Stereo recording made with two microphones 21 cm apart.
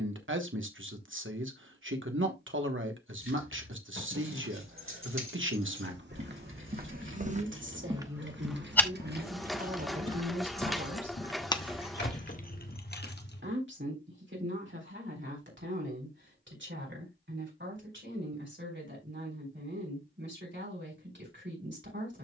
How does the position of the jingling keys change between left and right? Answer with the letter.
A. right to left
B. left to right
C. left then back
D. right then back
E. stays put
A.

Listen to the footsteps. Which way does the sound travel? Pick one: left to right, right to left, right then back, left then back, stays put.
right to left.